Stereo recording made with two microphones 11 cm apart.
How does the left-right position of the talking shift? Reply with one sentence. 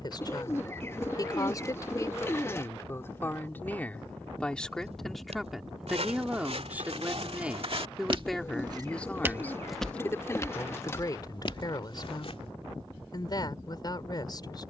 In this clip you hear the talking go right and come back.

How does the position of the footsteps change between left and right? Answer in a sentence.
In this clip you hear the footsteps go from the right side to the left.